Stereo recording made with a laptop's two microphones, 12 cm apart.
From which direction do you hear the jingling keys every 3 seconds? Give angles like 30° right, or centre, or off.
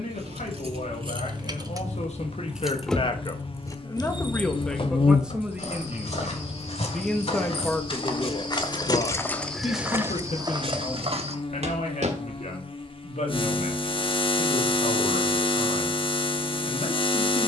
30° right, 40° left, 60° left, 10° right, off, off.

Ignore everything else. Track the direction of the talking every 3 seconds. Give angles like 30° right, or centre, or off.
70° left, 10° left, 10° left, 70° left, 80° left, 80° left.